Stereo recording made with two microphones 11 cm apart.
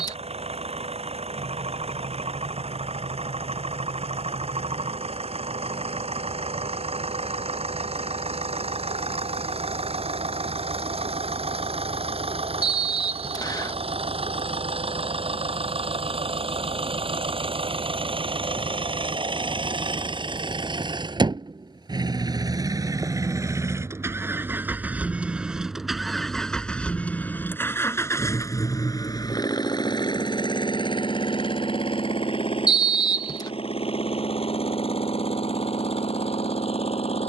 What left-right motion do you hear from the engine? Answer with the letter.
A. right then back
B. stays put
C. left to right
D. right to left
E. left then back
D.